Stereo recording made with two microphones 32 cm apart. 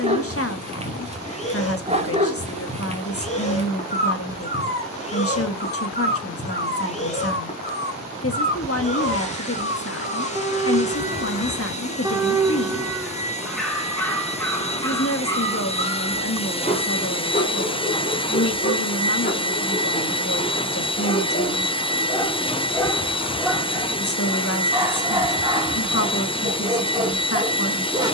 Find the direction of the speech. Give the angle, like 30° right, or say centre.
50° left.